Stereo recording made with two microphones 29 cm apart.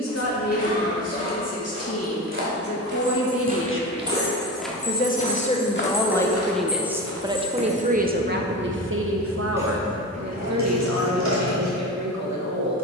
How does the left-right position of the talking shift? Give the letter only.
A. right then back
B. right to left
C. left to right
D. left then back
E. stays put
C.